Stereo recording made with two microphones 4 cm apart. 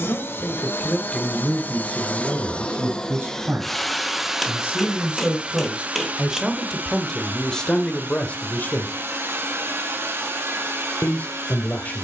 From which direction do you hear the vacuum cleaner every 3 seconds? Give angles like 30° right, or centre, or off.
40° left, 10° right, 50° right, 60° right.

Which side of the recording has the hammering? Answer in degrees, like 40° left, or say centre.
centre.